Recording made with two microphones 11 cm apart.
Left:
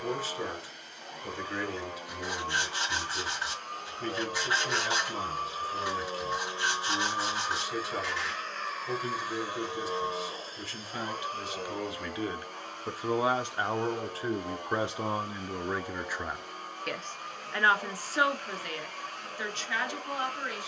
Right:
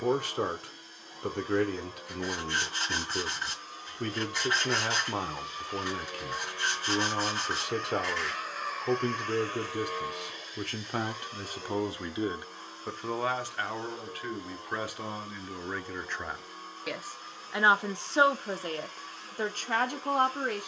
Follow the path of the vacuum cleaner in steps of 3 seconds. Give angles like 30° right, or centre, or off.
70° left, 50° left, 10° left, 40° left, 70° left, 70° left, 70° left.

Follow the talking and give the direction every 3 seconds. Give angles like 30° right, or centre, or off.
60° right, 60° right, 60° right, 50° right, 20° left, centre, 40° right.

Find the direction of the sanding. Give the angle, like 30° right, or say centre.
10° left.